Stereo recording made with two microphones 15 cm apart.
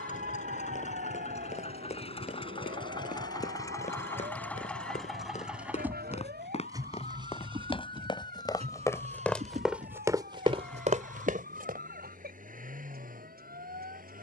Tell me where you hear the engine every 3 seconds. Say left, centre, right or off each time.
left, centre, right, right, right.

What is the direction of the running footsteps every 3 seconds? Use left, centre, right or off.
left, left, left, right, off.